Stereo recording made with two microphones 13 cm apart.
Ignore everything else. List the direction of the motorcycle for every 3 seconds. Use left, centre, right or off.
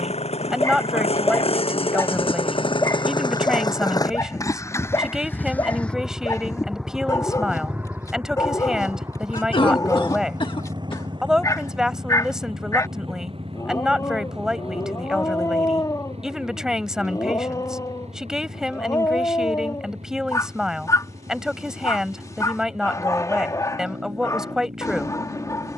left, left, centre, right, right, right, right, right, right.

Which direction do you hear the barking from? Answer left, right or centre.
left.